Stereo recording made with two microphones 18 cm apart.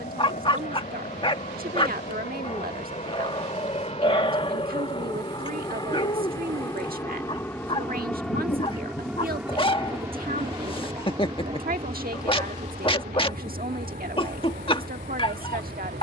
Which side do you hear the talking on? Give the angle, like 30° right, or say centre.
50° right.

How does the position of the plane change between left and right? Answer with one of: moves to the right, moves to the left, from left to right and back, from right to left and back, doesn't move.
moves to the right.